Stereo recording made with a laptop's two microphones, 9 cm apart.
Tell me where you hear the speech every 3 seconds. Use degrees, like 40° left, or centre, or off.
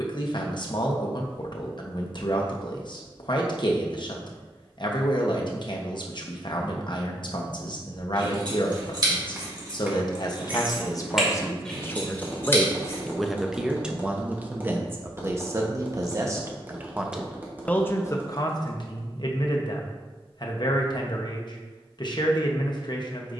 50° left, 50° left, 50° left, 40° left, centre, 20° right, 50° left, 50° left.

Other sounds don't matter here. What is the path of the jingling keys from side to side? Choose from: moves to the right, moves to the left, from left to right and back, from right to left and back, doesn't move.
moves to the left.